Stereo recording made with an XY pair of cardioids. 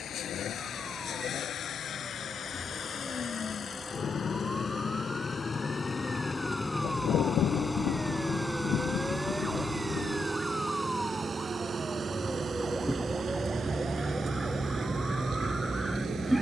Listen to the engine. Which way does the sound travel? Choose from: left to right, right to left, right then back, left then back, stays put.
left to right.